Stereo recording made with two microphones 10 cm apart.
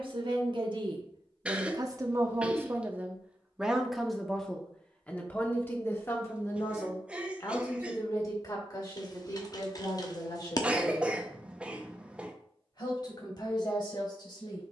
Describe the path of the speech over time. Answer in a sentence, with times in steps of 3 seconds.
You can hear the speech on the right from 0 s, in the centre from 3 s and on the left from 6 s.